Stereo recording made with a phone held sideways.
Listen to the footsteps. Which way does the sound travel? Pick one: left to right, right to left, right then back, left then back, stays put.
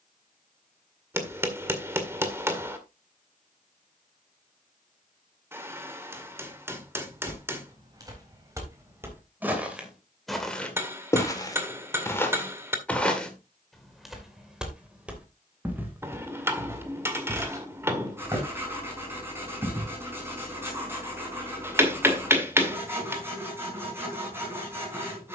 left then back.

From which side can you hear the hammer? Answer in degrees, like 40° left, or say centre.
20° right.